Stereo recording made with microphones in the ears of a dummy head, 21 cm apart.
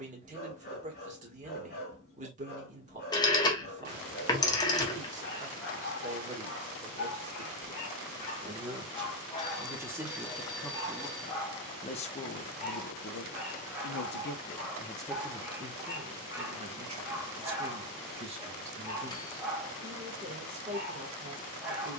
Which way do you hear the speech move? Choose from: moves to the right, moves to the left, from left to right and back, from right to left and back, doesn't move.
from right to left and back.